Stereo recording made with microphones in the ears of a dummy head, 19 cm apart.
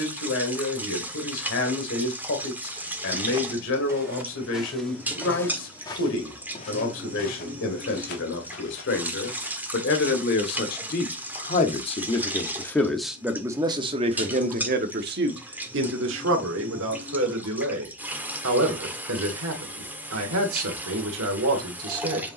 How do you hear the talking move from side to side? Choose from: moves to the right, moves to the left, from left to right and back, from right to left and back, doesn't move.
moves to the right.